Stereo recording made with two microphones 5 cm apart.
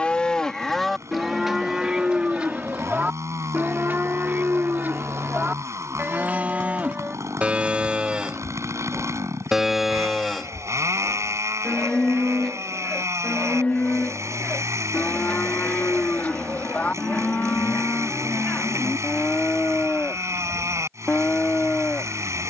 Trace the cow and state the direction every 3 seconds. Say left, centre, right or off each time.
centre, right, right, centre, left, left, left, left.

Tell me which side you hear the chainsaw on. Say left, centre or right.
right.